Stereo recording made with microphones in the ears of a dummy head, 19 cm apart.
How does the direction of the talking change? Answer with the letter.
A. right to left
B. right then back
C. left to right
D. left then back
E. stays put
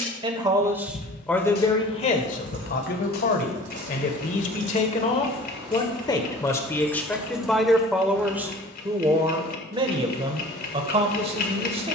D.